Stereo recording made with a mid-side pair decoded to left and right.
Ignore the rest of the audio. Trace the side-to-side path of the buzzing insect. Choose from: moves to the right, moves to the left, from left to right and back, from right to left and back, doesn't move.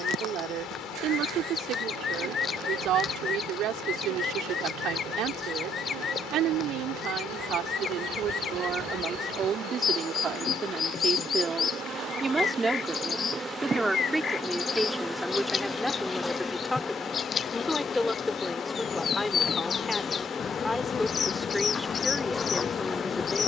moves to the left.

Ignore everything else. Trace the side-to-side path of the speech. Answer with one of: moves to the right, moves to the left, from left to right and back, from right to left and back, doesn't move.
moves to the left.